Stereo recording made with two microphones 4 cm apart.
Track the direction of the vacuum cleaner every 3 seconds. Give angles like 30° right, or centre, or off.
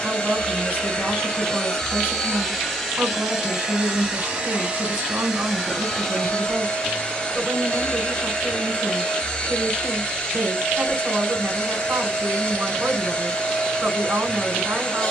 20° left, 10° right, 20° left, 30° left, 30° left.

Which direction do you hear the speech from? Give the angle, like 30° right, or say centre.
40° right.